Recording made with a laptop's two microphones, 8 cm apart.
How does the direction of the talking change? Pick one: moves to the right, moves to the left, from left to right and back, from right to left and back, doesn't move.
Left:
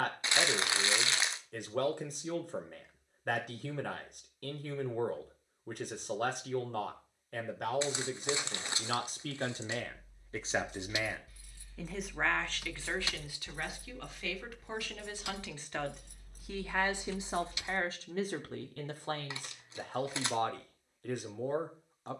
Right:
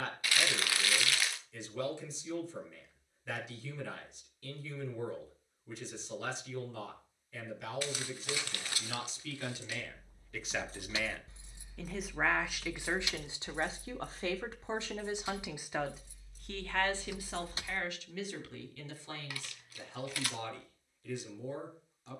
from left to right and back.